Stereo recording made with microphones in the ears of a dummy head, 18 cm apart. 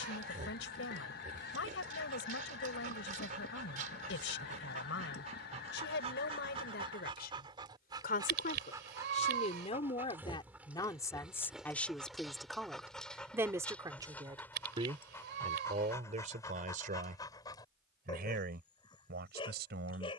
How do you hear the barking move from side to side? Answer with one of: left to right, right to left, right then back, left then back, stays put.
right to left.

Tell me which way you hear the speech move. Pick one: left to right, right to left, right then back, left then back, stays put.
left to right.